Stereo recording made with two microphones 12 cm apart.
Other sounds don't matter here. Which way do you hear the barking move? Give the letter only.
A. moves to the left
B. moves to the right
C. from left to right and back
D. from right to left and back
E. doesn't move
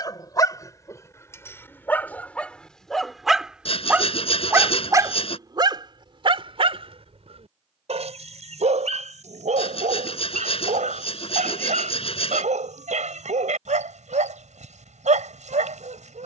B.